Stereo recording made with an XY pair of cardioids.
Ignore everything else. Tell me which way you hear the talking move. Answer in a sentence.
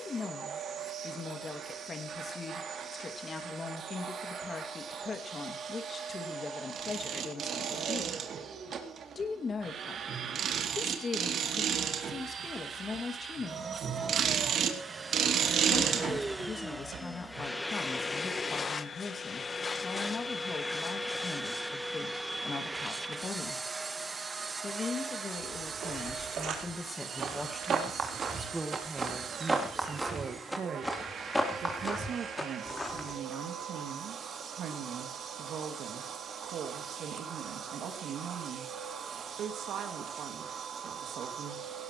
You can hear the talking go from the left side to the right.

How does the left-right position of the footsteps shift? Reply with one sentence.
In this clip you hear the footsteps go from the right side to the left.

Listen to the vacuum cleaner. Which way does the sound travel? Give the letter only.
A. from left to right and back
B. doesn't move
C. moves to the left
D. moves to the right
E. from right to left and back
E.